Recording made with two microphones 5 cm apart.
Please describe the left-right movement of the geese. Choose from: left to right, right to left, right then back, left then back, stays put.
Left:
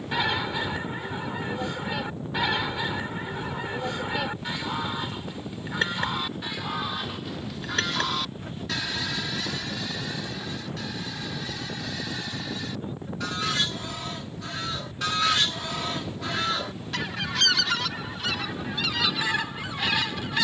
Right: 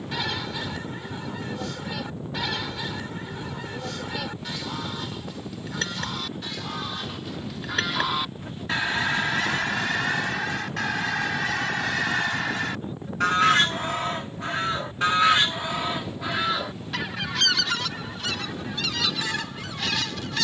right then back.